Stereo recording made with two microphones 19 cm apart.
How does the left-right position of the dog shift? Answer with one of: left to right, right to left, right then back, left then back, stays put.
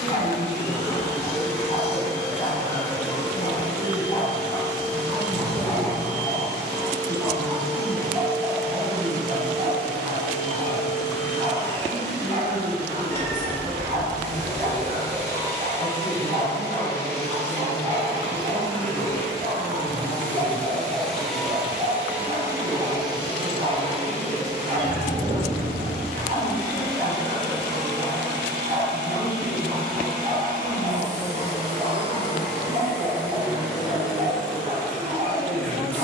left to right.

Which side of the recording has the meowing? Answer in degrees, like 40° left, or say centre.
10° left.